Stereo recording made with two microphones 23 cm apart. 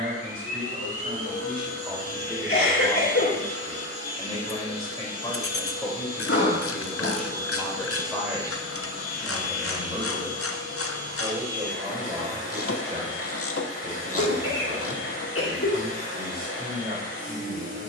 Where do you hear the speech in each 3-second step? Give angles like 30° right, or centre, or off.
20° right, 20° left, centre, 20° right, 30° right, 30° right.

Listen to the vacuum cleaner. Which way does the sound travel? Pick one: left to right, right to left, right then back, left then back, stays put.
stays put.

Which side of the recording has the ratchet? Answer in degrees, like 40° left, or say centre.
70° left.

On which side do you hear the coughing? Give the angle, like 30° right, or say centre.
70° left.